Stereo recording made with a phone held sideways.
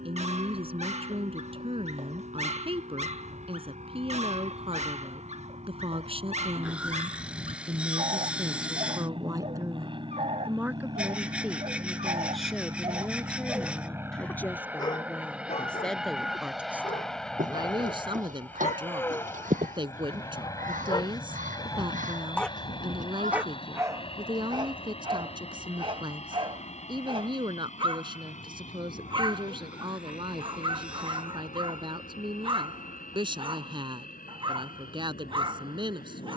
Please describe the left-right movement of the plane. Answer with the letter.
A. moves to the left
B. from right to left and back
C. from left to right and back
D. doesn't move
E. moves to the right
A.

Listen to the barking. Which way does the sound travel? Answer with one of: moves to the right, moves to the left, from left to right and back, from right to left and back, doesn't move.
from right to left and back.